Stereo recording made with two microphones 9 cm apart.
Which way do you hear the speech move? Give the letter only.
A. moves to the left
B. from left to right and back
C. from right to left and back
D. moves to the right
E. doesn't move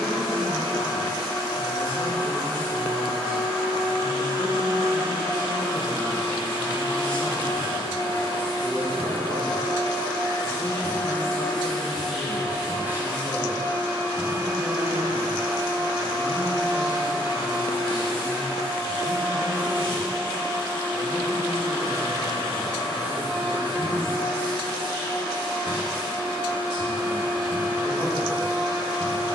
D.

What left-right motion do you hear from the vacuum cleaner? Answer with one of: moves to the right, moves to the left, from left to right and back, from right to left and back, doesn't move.
moves to the right.